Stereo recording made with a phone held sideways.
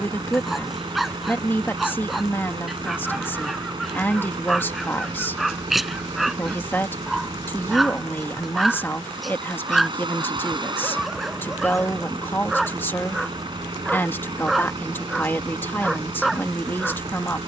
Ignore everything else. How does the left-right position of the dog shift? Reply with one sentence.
In this clip you hear the dog stay put.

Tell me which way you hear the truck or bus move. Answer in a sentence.
You can hear the truck or bus stay put.